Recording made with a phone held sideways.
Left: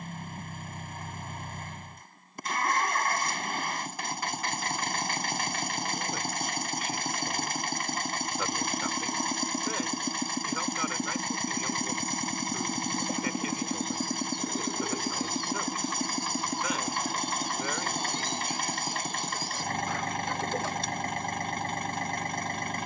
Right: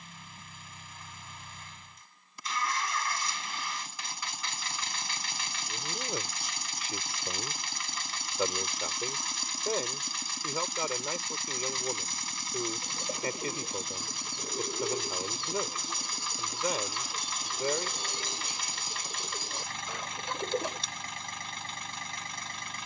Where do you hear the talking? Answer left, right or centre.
right.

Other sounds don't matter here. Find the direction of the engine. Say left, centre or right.
left.